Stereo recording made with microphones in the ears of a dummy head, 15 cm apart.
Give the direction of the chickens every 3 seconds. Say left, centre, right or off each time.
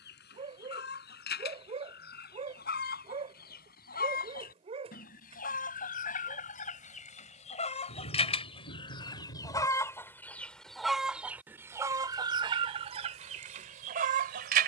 left, left, left, centre, right.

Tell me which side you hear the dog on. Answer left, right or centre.
right.